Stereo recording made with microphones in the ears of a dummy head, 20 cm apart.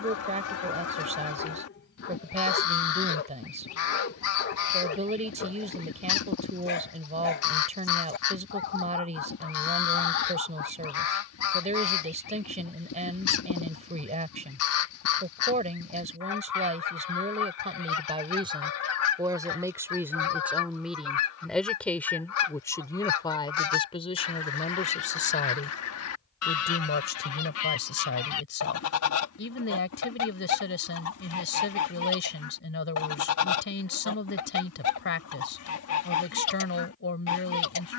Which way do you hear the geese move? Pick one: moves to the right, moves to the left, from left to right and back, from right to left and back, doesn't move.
doesn't move.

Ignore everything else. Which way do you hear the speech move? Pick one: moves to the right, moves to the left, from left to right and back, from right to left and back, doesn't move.
moves to the left.